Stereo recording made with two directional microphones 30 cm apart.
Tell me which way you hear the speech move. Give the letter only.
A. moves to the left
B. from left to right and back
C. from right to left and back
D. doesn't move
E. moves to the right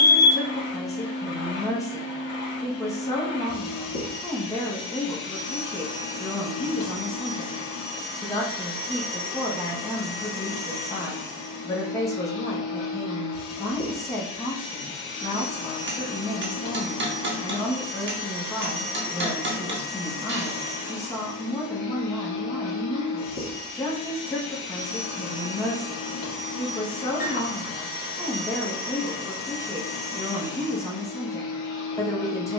D.